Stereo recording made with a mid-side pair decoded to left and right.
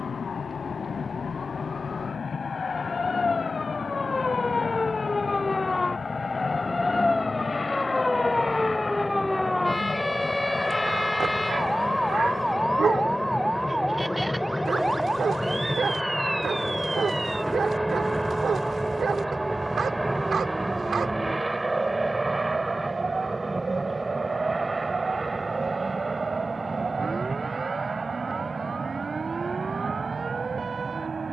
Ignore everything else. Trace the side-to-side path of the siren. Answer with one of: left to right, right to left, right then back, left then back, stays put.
left to right.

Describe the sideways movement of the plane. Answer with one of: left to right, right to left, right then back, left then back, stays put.
left to right.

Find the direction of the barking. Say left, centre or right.
right.